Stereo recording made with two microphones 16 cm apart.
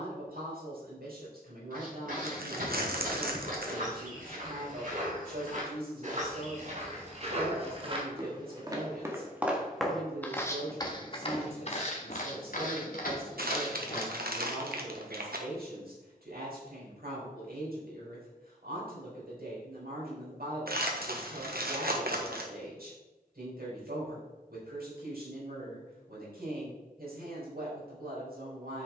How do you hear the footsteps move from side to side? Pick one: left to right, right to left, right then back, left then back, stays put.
right to left.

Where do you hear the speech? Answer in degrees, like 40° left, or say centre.
80° right.